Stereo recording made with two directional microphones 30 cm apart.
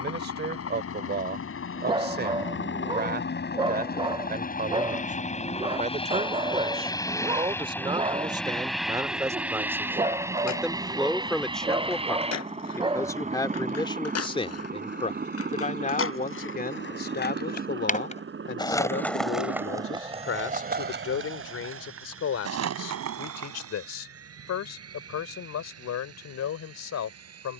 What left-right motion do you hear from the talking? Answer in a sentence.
In this clip you hear the talking go from the right side to the left.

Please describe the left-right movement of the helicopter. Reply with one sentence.
You can hear the helicopter go from the left side to the right.